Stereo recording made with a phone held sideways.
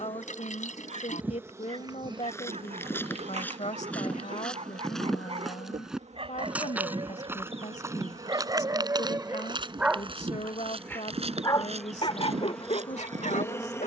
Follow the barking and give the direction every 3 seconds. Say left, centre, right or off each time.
right, right, right, centre, left.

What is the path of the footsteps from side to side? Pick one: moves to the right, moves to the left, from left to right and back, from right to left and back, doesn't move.
moves to the right.